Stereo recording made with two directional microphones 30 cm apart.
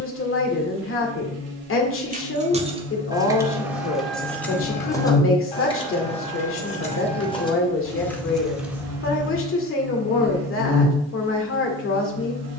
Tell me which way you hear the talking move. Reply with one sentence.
You can hear the talking stay put.